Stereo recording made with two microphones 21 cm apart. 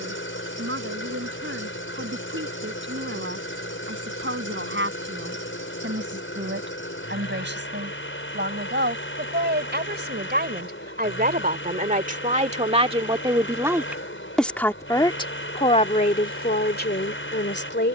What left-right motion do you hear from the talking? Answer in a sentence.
In this clip you hear the talking move to the left.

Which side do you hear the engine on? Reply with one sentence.
You can hear the engine on the left.